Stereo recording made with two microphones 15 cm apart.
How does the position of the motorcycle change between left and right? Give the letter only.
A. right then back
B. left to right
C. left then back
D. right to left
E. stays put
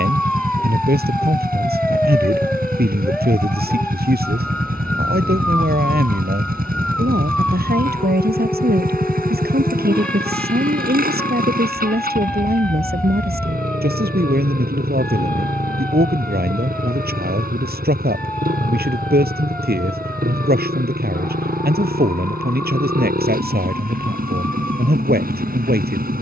E.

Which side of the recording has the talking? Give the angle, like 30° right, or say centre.
80° right.